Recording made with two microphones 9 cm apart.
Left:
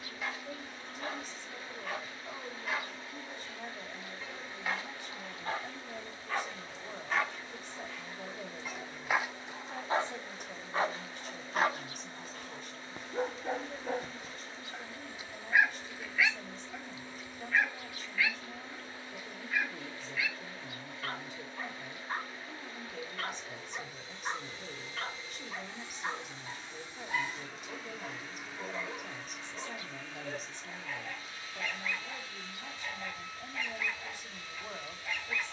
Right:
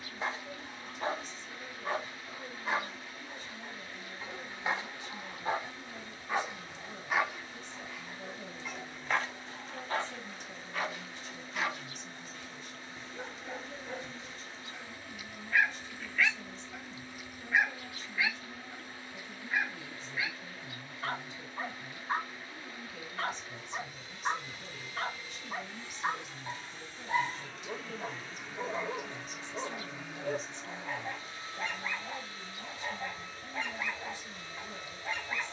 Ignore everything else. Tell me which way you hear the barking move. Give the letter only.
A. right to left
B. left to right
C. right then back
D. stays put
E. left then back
E.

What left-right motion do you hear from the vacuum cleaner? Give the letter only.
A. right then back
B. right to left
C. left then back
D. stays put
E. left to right
E.